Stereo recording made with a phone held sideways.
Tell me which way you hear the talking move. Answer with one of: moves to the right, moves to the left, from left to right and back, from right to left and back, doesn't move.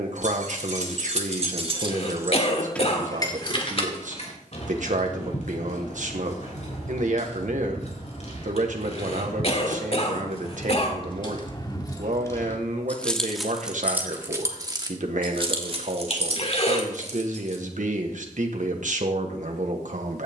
doesn't move.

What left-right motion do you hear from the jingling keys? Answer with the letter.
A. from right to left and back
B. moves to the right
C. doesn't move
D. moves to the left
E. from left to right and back
A.